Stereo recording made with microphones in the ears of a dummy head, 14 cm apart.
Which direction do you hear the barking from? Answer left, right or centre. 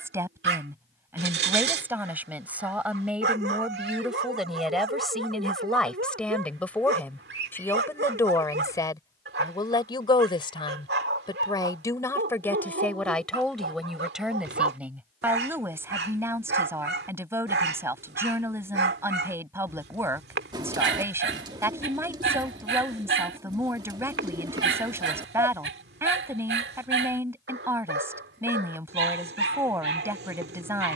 right.